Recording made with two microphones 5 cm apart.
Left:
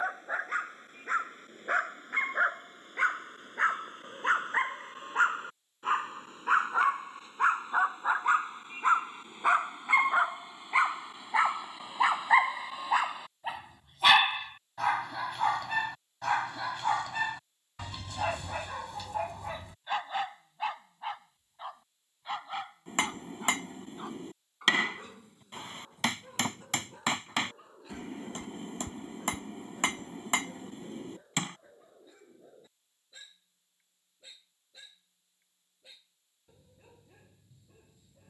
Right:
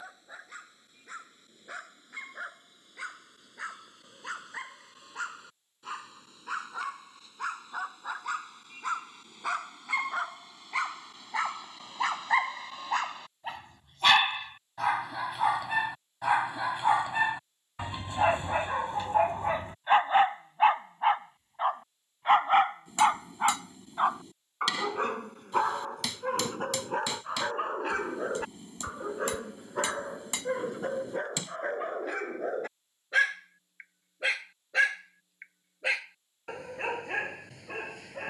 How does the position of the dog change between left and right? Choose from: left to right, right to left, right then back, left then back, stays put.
left to right.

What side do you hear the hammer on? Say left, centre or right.
left.